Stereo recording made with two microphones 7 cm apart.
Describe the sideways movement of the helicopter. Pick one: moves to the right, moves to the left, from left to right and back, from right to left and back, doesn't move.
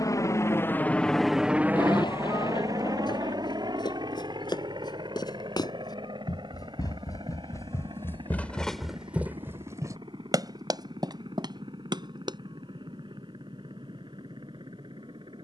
moves to the right.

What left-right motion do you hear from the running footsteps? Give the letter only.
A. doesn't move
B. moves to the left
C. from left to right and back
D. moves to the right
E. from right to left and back
D.